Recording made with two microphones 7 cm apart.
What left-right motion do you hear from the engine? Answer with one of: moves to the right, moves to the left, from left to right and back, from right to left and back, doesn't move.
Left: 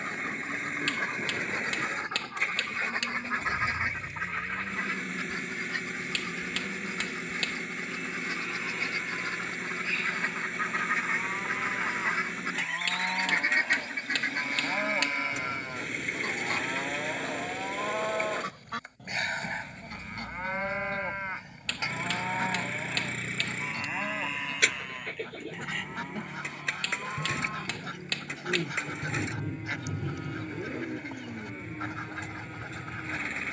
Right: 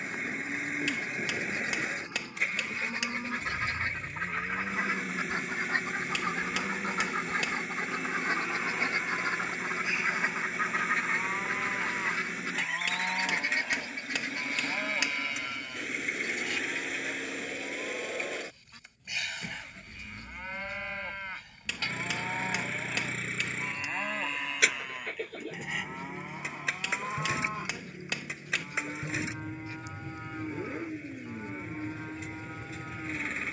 doesn't move.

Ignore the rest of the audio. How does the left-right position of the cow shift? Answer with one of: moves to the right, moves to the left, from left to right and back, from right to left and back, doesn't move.
from right to left and back.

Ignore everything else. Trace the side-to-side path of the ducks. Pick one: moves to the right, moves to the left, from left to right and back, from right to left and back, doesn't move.
from left to right and back.